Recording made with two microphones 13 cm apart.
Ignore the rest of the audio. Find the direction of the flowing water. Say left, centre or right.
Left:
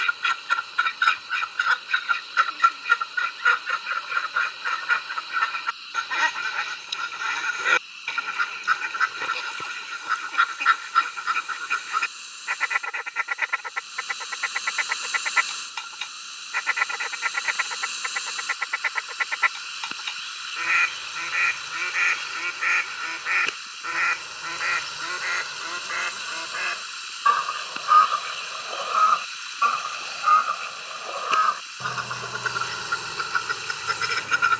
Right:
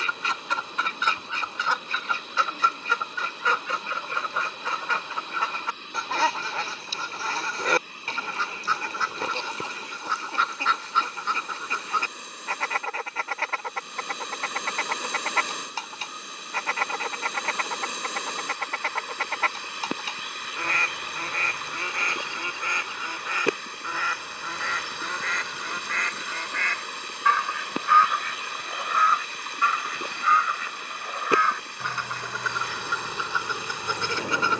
right.